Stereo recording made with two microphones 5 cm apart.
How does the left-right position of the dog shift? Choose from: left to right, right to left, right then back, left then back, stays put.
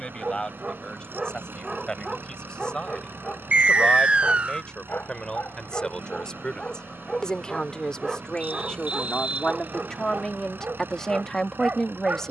left then back.